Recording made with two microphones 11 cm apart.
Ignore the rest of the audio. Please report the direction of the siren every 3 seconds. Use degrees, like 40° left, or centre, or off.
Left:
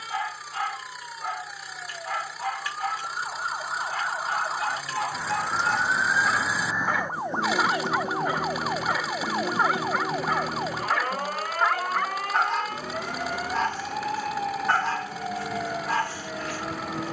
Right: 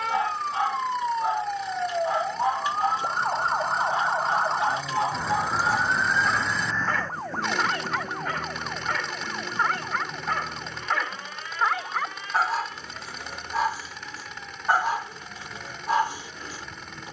60° right, 30° right, 20° left, 50° left, 60° left, 70° left.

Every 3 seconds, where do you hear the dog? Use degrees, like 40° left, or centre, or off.
20° right, 20° right, 10° left, centre, 10° right, 20° right.